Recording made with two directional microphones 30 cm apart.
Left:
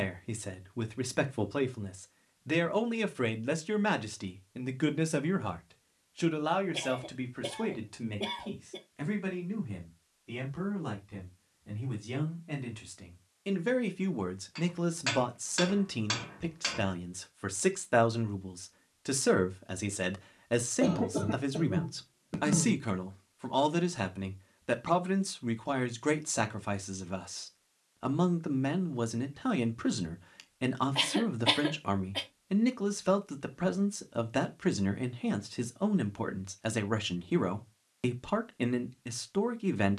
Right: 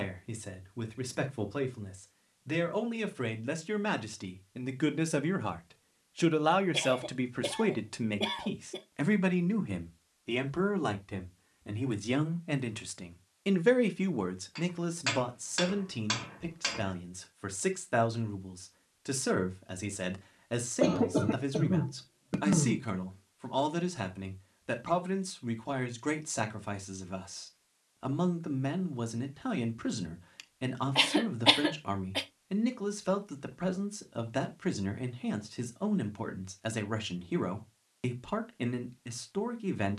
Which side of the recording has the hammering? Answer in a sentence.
In this clip you hear the hammering in the centre.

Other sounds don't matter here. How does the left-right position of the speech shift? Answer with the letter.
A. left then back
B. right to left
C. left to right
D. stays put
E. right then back
E.